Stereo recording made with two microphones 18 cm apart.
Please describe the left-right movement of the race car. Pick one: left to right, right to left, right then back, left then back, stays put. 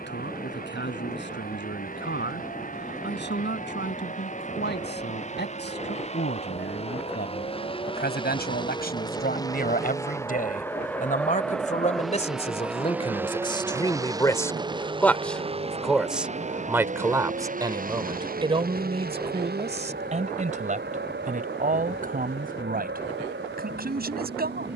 left to right.